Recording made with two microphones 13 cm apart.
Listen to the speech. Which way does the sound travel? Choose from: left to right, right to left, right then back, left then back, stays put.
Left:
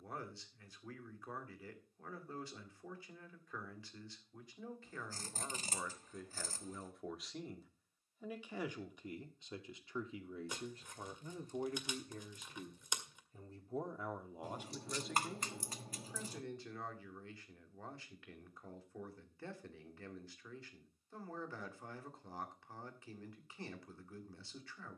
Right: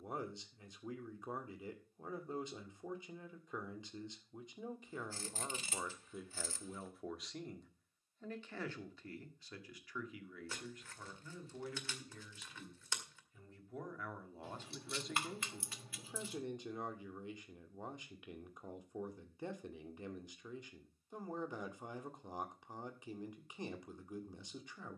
left then back.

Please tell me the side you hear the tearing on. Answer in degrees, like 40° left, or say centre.
20° left.